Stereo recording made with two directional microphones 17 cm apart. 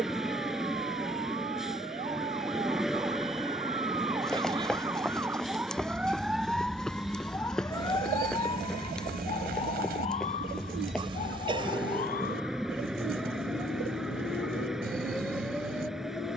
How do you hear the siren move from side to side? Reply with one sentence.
In this clip you hear the siren travel towards the left.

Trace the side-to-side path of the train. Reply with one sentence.
In this clip you hear the train stay in one place.